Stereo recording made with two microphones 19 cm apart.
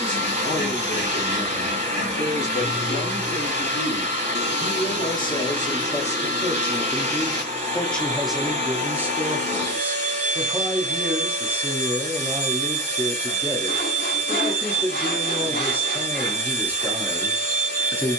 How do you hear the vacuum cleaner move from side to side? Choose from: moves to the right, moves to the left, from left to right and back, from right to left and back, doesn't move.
doesn't move.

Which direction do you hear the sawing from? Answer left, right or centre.
left.